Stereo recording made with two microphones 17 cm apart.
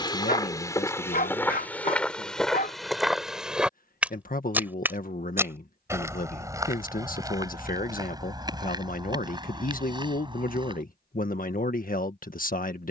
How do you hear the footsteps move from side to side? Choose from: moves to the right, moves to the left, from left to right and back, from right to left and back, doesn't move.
moves to the right.